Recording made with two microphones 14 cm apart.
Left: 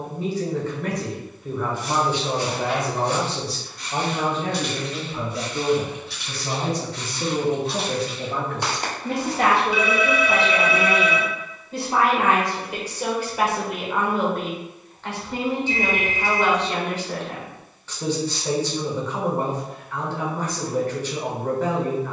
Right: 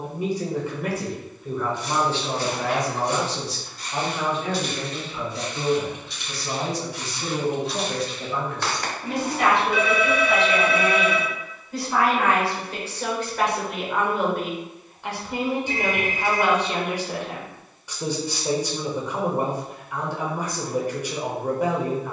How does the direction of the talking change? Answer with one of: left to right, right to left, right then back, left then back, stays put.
left then back.